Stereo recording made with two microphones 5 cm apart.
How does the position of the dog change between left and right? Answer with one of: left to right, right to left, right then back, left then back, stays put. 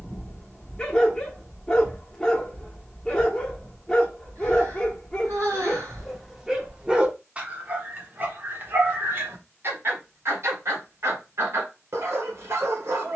left to right.